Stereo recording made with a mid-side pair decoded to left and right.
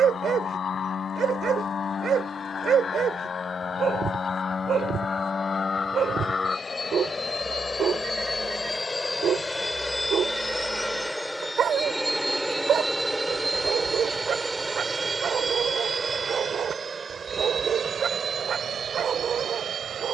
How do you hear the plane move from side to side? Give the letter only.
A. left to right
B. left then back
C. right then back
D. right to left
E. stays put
A.